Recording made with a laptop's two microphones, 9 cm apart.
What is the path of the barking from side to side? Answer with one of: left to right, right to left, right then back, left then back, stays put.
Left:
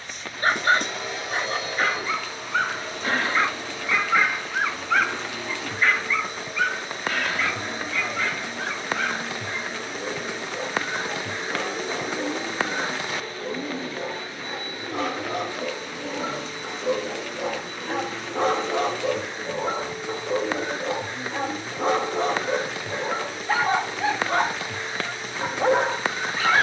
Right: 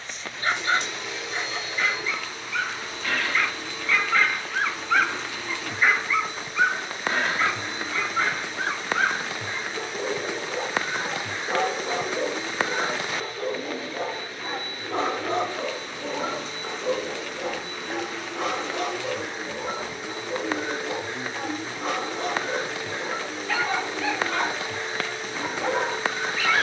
right then back.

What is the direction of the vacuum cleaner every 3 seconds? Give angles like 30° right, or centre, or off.
50° left, 50° left, 50° left, 50° left, 30° left, 10° left, 10° right, 30° right, 30° right.